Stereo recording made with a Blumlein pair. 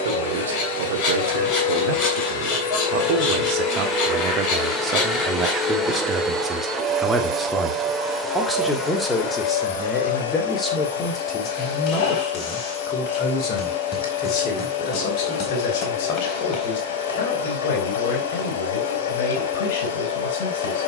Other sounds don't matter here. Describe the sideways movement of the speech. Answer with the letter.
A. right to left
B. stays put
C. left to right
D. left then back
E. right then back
A.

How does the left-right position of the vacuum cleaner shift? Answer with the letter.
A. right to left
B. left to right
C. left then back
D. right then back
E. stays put
D.